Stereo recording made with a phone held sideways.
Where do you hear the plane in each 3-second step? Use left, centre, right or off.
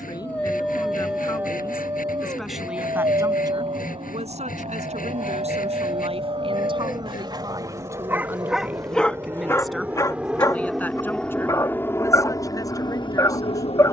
right, right, right, centre, left.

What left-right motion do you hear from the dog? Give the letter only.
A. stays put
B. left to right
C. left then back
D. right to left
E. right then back
E.